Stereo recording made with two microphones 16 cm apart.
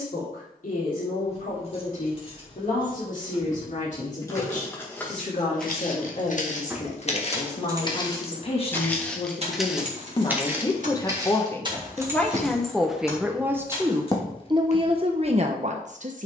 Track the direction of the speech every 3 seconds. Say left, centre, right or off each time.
left, left, left, left, centre, right.